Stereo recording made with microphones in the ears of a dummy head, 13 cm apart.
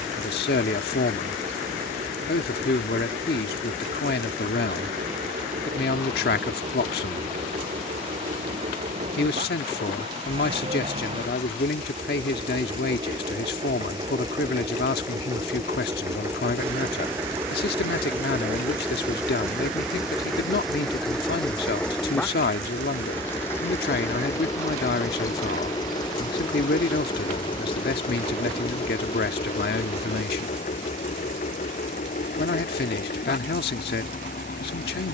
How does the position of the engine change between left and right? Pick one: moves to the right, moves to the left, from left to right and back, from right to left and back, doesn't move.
moves to the left.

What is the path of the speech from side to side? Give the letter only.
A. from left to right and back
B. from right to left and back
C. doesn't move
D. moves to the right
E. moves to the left
C.